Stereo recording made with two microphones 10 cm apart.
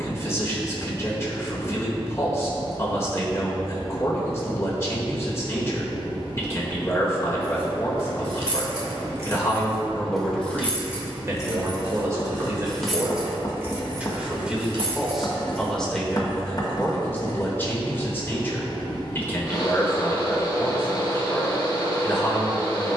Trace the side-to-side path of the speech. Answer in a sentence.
In this clip you hear the speech move from left to right and back again.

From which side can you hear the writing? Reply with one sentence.
In this clip you hear the writing on the left.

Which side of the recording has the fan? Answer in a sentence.
You can hear the fan on the left.